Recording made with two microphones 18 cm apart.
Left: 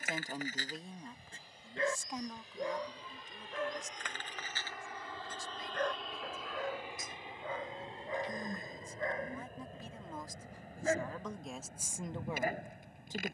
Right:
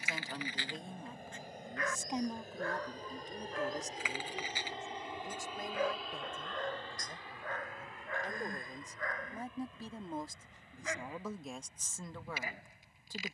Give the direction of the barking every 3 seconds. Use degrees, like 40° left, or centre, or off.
30° left, 10° right, 10° left, 40° left, 60° left.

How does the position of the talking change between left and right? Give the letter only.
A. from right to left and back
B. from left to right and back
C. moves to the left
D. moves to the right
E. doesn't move
B.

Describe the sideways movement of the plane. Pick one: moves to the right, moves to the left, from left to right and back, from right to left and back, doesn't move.
moves to the left.